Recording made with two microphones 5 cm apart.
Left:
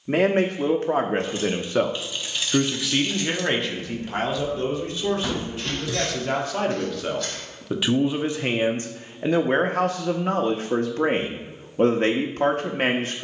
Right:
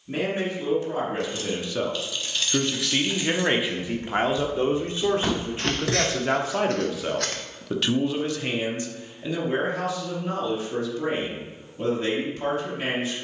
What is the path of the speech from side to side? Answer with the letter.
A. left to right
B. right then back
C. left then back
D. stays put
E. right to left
B.